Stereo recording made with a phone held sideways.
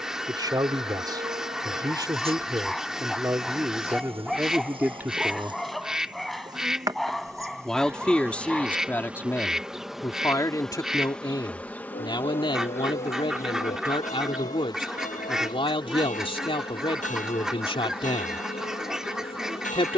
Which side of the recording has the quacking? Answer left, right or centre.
centre.